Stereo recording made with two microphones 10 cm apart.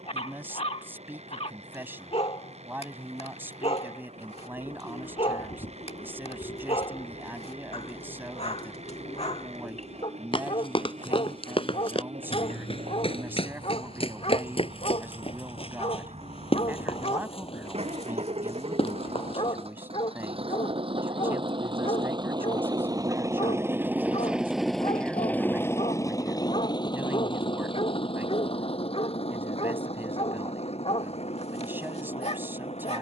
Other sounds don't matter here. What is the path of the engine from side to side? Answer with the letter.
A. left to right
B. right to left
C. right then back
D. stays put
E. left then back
B.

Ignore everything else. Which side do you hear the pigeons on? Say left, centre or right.
left.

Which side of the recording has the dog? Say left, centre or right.
left.